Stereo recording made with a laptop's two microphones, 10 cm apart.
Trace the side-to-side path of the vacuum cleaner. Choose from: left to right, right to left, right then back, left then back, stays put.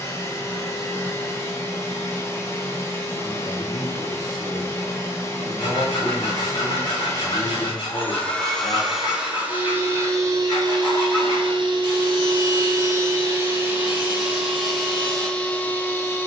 right then back.